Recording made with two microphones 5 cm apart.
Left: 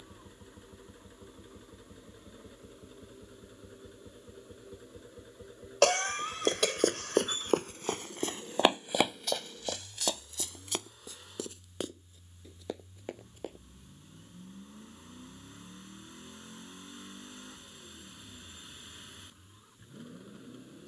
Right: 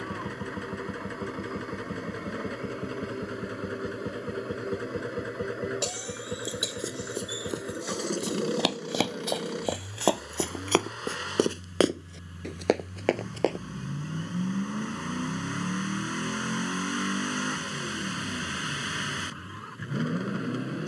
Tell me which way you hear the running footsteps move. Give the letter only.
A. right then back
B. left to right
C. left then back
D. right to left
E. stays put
B.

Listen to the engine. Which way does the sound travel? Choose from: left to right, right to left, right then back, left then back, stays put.
stays put.